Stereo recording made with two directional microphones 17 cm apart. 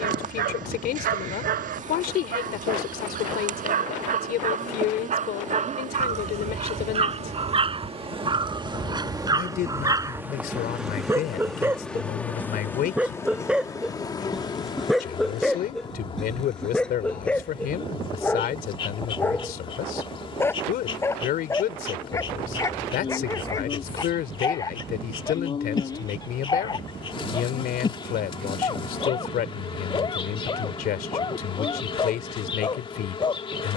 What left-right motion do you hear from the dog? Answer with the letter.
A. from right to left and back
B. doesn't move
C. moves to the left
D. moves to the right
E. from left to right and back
C.